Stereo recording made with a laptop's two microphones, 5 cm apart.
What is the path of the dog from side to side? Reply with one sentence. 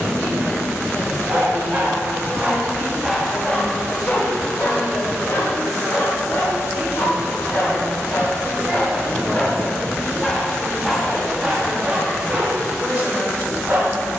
You can hear the dog go left and come back.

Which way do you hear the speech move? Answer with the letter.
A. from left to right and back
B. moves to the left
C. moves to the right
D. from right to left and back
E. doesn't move
A.